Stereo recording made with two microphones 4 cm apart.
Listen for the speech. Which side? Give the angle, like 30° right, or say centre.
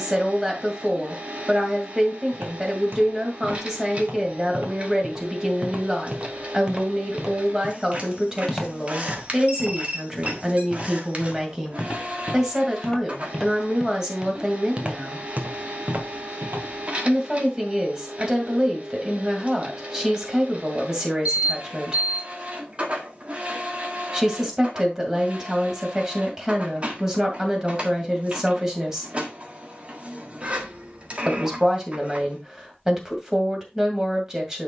20° right.